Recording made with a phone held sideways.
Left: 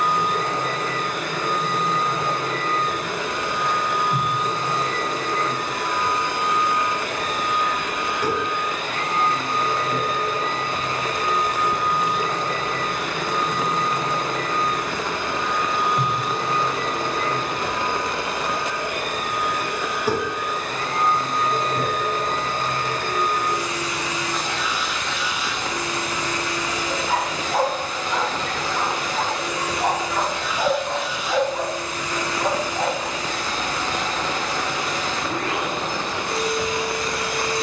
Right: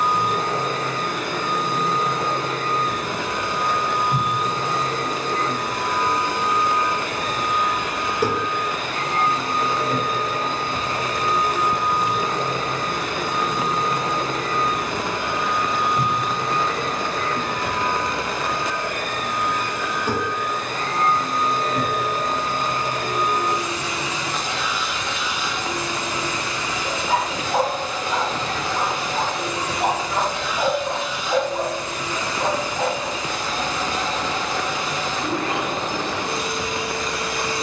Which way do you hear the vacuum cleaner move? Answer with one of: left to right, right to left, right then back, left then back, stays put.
left then back.